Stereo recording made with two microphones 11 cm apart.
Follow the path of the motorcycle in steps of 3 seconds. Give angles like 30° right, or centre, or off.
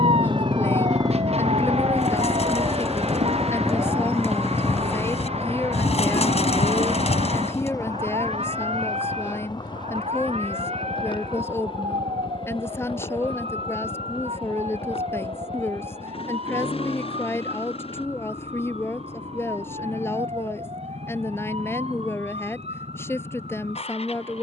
30° right, 10° left, 30° left, 40° left, 50° left, 50° left, 50° left, 60° left.